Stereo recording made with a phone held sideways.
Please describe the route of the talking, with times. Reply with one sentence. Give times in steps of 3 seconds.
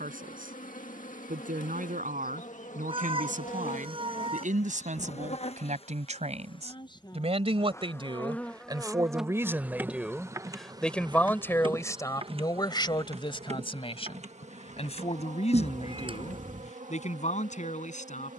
In this clip you hear the talking on the right from 0 s, in the centre from 9 s and on the left from 12 s.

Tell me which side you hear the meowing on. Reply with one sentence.
In this clip you hear the meowing on the right.